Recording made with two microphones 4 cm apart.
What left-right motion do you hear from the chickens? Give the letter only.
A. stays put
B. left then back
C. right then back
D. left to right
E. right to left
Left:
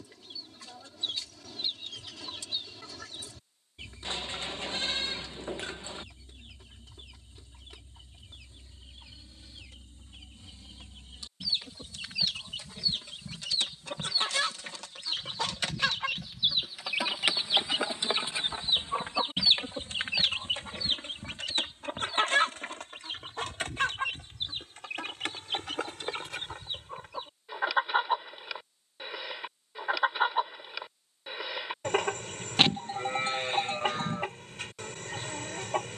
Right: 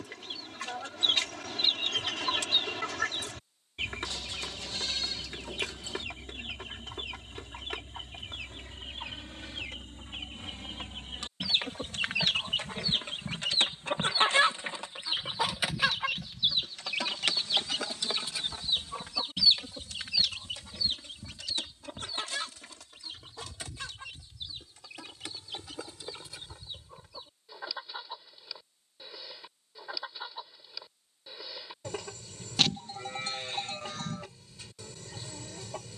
E.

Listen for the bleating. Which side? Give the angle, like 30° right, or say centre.
30° left.